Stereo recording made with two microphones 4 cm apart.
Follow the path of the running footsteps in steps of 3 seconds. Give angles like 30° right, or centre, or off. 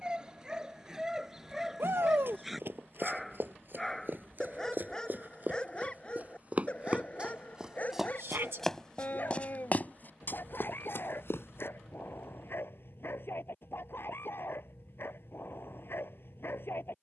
60° right, 50° right, 20° right, 50° left, off, off.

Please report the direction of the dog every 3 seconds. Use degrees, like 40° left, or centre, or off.
10° right, 10° left, 30° left, 50° left, 60° left, 60° left.